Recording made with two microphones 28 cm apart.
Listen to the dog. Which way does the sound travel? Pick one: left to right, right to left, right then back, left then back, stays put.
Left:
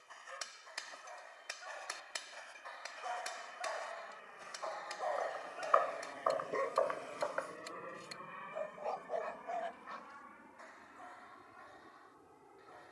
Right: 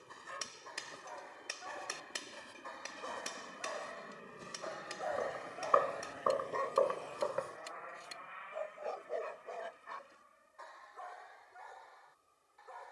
left then back.